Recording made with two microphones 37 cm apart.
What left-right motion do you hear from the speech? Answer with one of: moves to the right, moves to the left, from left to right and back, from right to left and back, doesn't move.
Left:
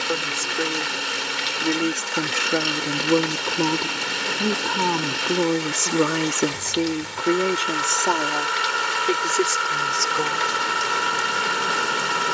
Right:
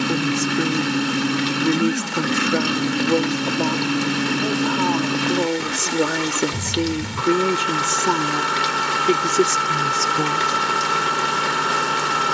from right to left and back.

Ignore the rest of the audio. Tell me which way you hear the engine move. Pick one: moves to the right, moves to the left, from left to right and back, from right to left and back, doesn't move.
doesn't move.